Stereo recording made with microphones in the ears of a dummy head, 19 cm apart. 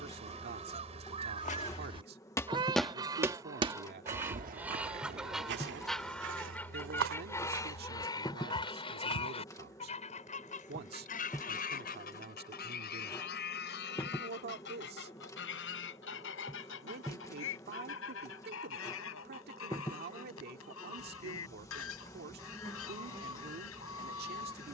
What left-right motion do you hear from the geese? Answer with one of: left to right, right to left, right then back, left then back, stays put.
right to left.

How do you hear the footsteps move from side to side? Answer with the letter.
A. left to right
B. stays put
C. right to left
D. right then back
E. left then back
A.